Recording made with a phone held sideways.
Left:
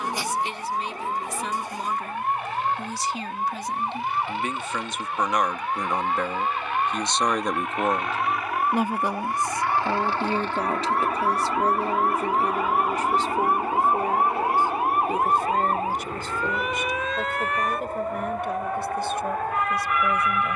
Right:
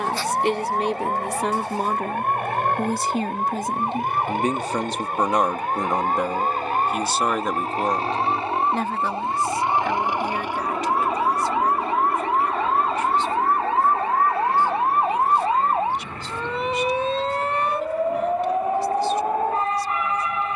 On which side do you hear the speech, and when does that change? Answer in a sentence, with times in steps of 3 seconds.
In this clip you hear the speech on the right from 0 s, in the centre from 6 s and on the left from 9 s.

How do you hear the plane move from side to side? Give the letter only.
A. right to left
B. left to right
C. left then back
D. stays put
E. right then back
A.